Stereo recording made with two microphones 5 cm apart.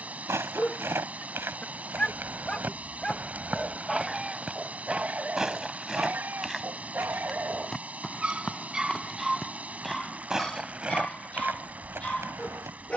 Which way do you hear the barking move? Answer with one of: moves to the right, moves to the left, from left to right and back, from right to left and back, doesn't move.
from left to right and back.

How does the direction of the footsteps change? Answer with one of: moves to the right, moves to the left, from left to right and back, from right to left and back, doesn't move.
from right to left and back.